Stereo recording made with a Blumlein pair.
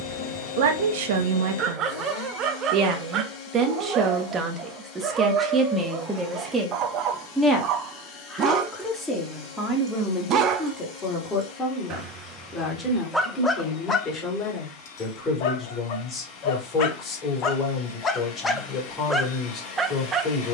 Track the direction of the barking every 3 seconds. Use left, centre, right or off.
right, right, right, right, centre, left, centre.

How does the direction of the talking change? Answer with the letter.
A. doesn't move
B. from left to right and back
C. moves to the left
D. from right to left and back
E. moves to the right
C.